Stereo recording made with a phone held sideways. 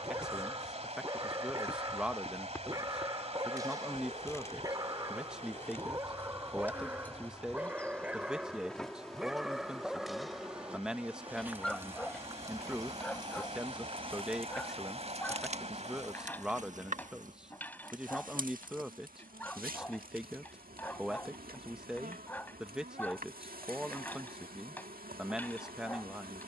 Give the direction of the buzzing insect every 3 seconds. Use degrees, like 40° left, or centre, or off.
20° left, 20° left, 10° left, 10° right, 30° right, 60° right, 80° right, 80° right, 80° right.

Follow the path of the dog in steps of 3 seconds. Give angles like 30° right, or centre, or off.
20° right, 20° right, 10° right, centre, 10° left, 10° left, 10° left, 10° left, 10° left.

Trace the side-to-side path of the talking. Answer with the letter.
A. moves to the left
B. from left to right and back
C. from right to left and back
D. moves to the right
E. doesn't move
E.